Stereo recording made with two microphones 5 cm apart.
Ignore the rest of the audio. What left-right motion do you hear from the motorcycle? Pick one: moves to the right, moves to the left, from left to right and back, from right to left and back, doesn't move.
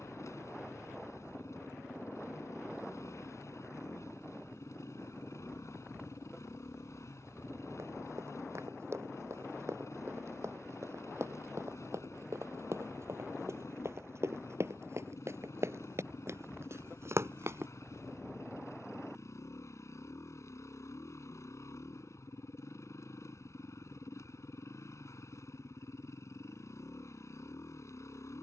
doesn't move.